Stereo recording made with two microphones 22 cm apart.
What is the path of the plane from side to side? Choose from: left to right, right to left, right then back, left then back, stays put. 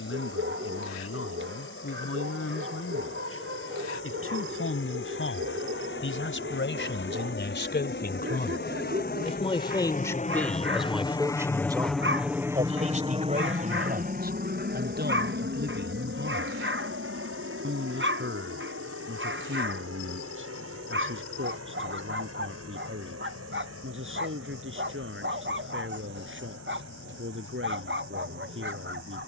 left to right.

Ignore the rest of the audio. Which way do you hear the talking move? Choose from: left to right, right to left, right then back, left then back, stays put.
left to right.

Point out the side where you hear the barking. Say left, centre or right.
right.